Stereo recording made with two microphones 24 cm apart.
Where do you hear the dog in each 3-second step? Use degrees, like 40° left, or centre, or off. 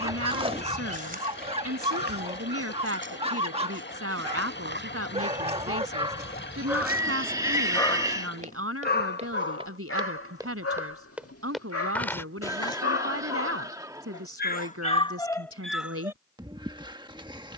20° right, 20° right, 10° left, 70° left, 60° left, 10° right.